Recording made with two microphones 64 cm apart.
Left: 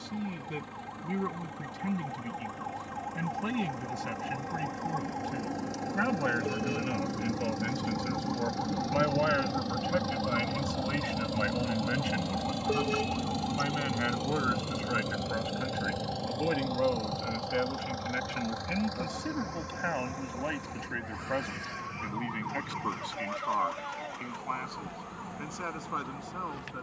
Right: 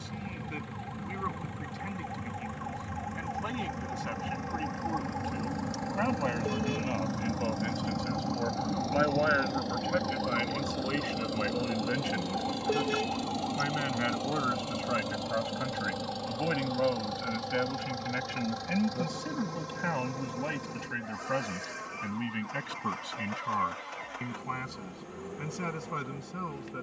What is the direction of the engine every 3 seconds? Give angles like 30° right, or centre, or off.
60° left, 60° left, 50° left, 30° left, centre, 40° right, 60° right, 70° right, 70° right.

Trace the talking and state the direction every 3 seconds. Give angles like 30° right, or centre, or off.
60° left, 50° left, 40° left, 20° left, centre, 20° right, 30° right, 40° right, 50° right.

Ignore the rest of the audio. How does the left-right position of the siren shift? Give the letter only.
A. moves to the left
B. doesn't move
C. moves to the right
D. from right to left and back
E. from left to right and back
A.